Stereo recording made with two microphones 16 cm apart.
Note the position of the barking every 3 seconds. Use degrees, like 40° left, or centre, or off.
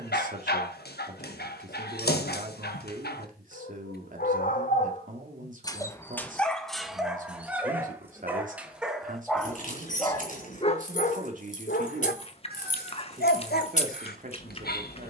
80° left, 50° left, centre, 30° left, 70° left.